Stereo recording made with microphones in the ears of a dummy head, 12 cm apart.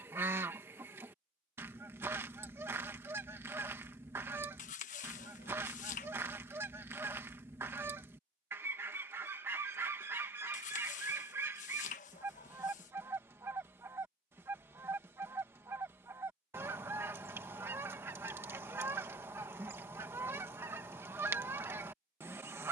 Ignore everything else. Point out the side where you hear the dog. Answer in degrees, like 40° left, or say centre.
50° left.